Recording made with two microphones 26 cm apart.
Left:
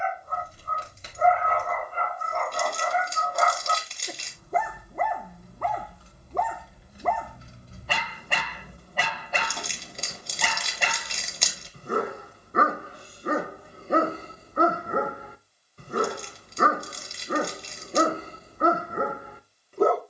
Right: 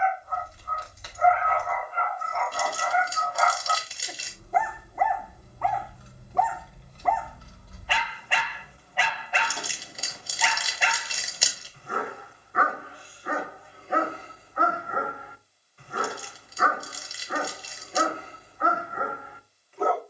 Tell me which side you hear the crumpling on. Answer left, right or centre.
centre.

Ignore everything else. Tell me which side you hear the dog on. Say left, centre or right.
left.